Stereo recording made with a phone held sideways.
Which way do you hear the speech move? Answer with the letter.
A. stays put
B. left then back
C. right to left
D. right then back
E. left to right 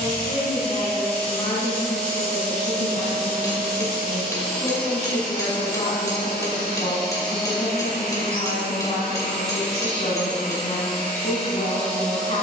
A.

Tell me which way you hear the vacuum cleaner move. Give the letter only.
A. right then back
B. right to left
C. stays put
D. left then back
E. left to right
C.